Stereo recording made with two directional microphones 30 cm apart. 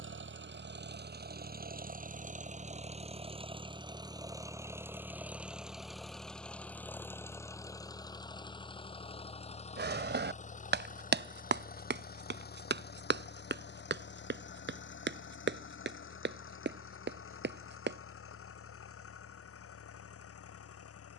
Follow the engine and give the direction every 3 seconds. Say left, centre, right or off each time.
right, centre, centre, left, left, left, left.